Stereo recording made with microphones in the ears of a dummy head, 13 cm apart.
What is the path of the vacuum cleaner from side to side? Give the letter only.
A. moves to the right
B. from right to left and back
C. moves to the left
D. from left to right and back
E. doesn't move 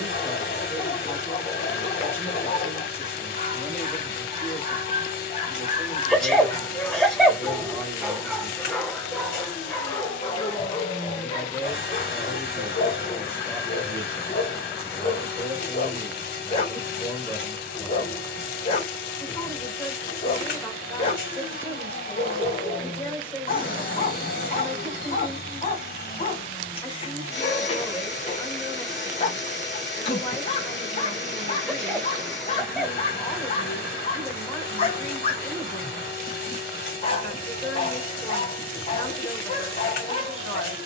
E.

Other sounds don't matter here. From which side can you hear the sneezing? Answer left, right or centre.
centre.